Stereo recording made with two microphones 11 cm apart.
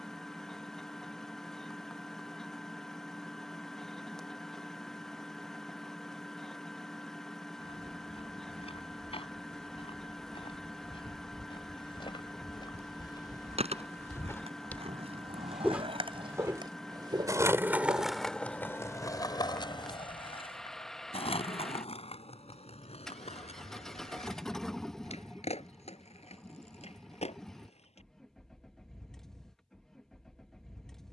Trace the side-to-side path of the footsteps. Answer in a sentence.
In this clip you hear the footsteps move to the right.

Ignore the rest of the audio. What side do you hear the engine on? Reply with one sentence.
In this clip you hear the engine in the centre.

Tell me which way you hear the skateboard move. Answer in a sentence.
In this clip you hear the skateboard move to the left.